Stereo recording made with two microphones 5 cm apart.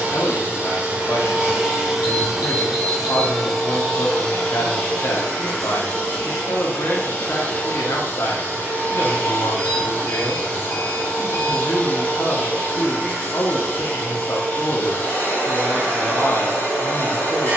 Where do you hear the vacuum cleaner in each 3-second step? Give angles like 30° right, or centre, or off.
20° right, 10° left, 20° left, 20° left, 20° left, 20° left.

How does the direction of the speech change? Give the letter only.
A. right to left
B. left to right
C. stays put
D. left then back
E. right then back
C.